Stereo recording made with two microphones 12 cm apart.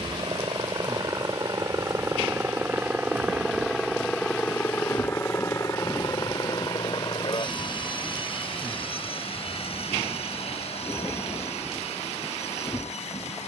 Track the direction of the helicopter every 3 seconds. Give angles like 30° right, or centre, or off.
30° right, 10° left, 40° left, 60° left, 70° left.